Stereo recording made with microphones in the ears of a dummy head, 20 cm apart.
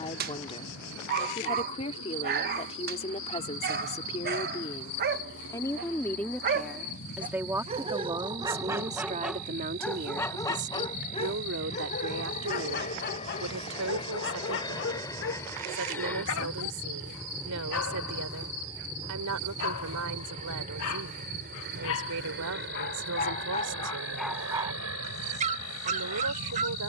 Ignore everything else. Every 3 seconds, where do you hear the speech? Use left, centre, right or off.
left, left, centre, right, right, right, right, right, right.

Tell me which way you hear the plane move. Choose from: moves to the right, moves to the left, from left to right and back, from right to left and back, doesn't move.
moves to the right.